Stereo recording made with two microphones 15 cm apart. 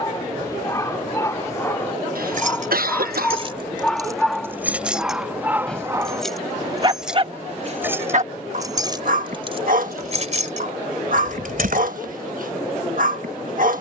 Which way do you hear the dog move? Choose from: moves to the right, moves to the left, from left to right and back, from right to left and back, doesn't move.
moves to the right.